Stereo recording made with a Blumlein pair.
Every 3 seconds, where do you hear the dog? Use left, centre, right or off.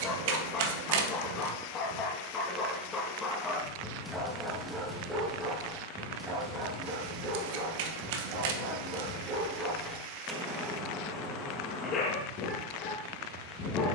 left, centre, right, centre, left.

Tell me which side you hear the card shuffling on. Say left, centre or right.
right.